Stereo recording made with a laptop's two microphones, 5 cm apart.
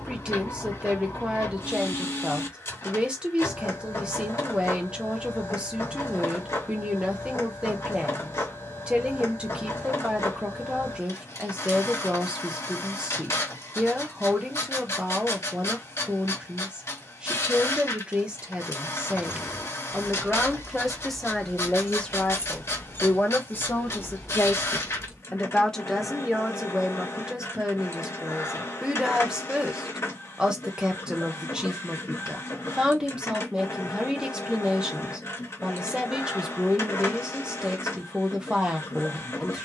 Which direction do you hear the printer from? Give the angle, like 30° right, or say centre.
60° left.